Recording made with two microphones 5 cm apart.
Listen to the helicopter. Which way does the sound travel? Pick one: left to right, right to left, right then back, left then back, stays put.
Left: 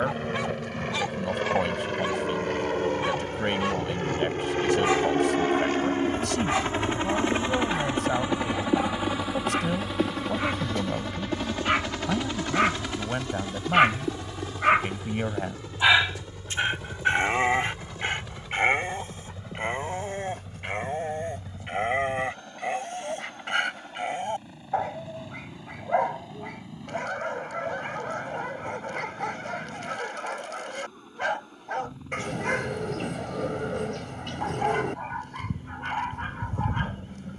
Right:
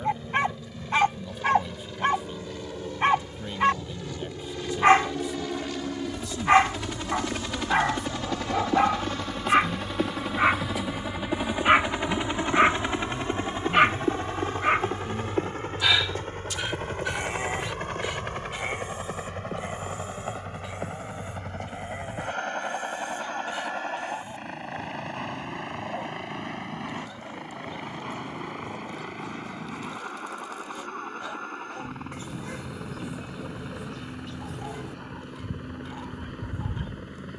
left to right.